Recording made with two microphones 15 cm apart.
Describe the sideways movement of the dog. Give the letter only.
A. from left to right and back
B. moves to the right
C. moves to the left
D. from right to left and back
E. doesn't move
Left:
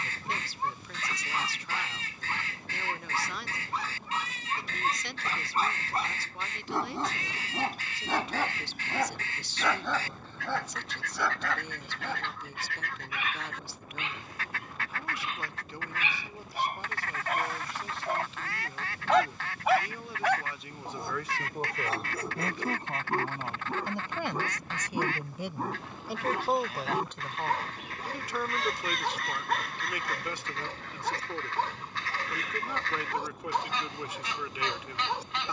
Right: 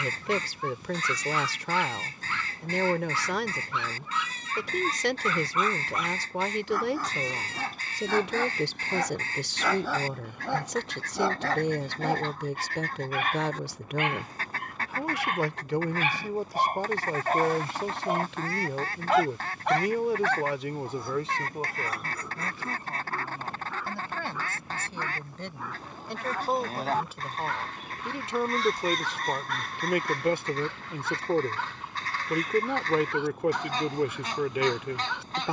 A.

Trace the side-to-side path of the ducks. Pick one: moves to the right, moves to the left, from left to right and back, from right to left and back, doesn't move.
doesn't move.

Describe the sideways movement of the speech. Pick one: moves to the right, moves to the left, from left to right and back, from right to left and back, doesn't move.
from right to left and back.